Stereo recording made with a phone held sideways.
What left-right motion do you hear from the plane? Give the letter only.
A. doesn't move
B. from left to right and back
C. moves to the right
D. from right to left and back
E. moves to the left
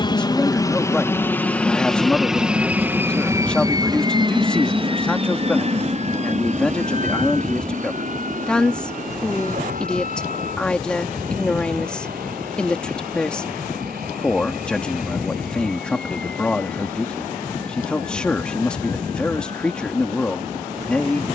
C.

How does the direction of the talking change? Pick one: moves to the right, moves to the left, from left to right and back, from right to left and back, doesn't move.
doesn't move.